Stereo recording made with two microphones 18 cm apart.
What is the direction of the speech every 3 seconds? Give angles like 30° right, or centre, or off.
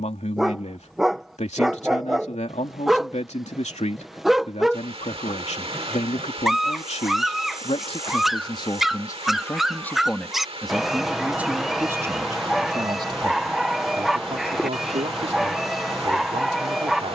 40° left, 40° left, 30° left, centre, 30° right, 40° right.